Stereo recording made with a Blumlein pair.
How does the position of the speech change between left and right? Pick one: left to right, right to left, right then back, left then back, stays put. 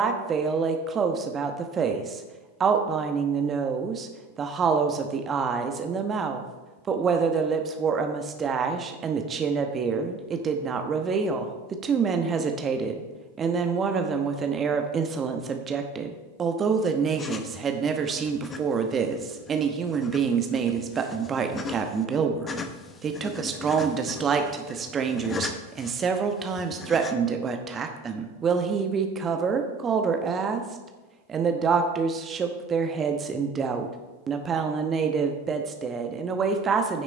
stays put.